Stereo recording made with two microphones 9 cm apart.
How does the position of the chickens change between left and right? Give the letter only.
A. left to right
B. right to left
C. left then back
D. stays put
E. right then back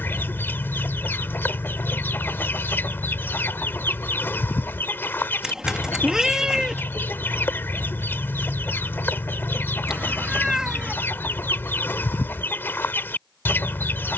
D.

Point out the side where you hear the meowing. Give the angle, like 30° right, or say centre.
10° right.